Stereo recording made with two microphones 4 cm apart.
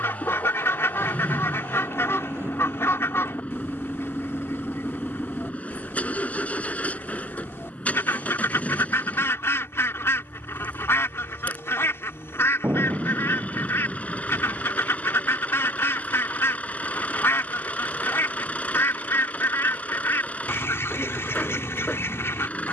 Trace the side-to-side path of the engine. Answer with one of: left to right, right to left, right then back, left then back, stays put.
stays put.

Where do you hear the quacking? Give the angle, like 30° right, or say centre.
70° left.